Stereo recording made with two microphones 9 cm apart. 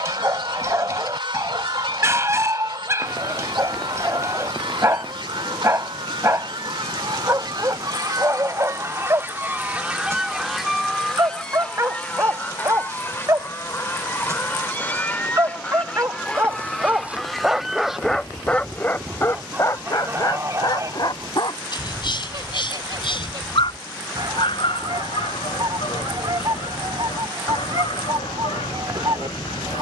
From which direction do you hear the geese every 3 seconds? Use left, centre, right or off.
right, right, right, centre, left, centre, right, right, right, right.